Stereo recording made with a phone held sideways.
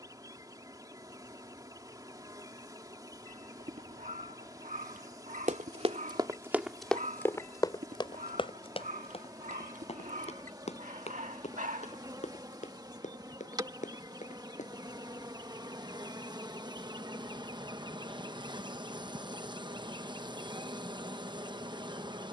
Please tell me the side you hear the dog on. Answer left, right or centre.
right.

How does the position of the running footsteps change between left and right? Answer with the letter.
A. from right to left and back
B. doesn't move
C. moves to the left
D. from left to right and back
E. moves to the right
C.